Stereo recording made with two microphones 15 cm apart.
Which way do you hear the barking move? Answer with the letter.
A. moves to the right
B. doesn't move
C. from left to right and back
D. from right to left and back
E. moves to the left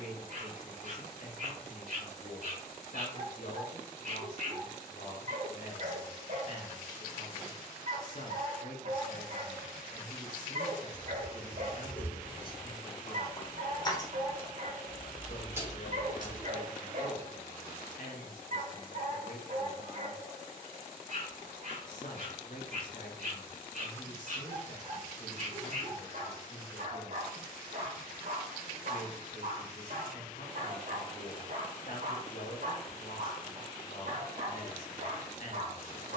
B.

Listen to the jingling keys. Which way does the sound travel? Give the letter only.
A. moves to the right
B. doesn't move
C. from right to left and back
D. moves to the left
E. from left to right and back
C.